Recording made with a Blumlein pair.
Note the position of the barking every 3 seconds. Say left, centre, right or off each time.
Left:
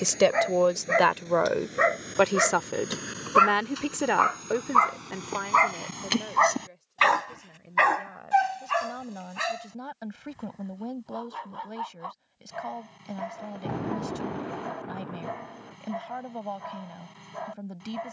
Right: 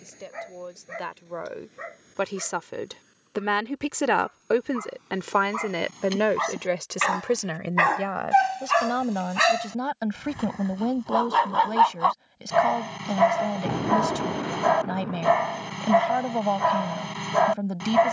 left, left, centre, right, right, right.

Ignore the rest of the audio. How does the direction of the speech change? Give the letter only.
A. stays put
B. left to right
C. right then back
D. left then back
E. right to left
B.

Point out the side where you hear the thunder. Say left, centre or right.
centre.